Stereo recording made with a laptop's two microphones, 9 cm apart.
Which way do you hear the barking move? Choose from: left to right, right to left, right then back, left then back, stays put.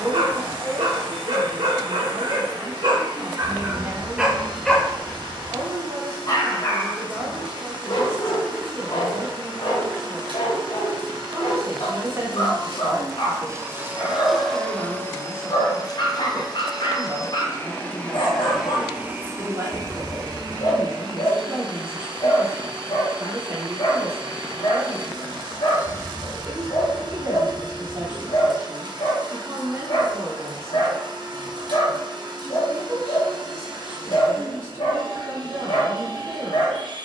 right to left.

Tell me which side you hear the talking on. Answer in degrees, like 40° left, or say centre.
30° right.